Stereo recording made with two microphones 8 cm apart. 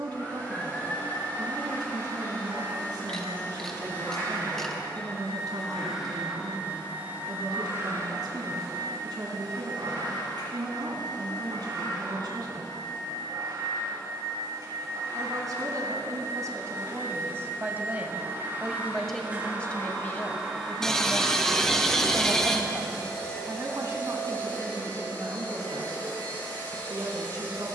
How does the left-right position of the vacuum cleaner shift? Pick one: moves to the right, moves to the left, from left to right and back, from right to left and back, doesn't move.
from left to right and back.